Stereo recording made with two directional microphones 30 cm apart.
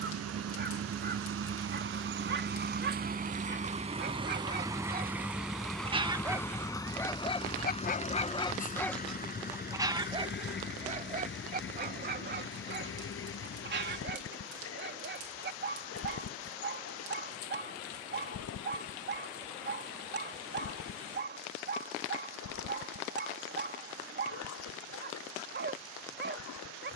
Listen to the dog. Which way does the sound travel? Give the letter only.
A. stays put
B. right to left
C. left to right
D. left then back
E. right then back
D.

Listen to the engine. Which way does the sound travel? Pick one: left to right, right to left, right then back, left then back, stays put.
right to left.